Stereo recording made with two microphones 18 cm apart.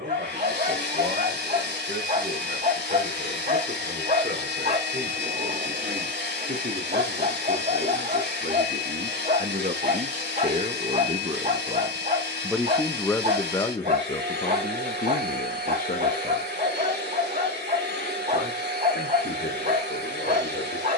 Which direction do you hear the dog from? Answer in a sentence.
In this clip you hear the dog on the right.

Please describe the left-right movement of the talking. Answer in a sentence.
In this clip you hear the talking move from right to left.